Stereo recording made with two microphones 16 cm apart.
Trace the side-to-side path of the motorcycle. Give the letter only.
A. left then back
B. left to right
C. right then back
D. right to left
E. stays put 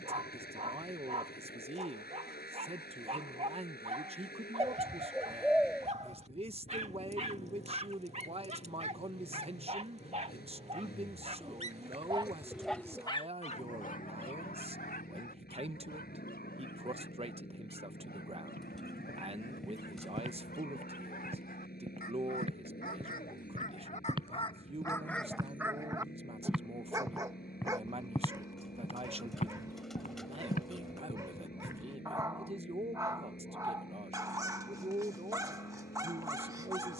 E.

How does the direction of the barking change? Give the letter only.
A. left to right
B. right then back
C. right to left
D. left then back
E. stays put
D.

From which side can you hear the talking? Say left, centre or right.
right.